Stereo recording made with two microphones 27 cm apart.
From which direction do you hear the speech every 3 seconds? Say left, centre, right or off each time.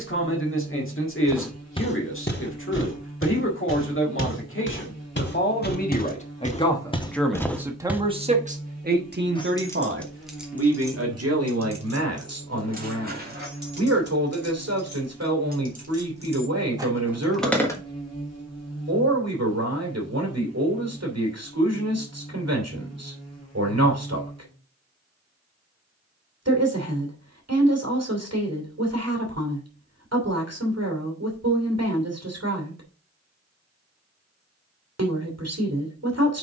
left, left, centre, right, right, right, right, right, right, right, right, right.